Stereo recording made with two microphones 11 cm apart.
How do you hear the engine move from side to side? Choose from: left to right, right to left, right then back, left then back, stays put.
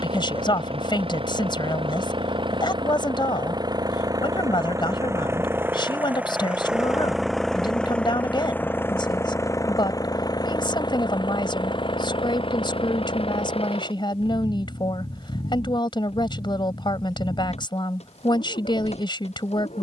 right to left.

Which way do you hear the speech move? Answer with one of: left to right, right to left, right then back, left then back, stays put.
stays put.